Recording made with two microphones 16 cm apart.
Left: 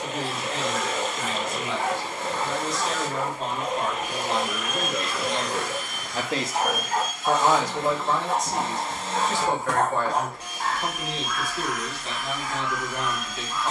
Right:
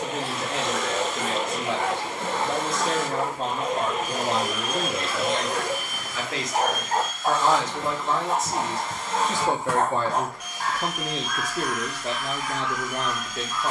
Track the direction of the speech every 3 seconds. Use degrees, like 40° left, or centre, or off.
60° right, 30° right, 10° left, 30° right, 50° right.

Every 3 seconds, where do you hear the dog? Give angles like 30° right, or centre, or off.
70° right, 60° right, 30° right, centre, 20° left.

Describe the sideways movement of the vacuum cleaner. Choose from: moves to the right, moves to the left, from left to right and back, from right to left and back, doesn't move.
moves to the left.